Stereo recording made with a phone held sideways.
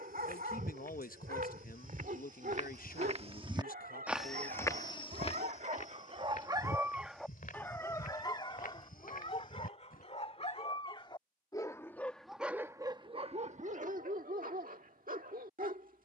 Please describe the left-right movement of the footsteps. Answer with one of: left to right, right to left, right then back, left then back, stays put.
right to left.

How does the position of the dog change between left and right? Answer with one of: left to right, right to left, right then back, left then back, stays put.
left then back.